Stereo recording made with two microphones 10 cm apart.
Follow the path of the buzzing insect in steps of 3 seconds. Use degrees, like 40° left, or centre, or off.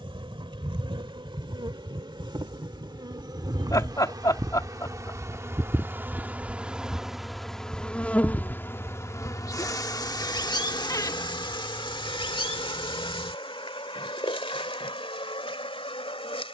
60° right, 40° right, centre, 40° left, 60° left, 70° left.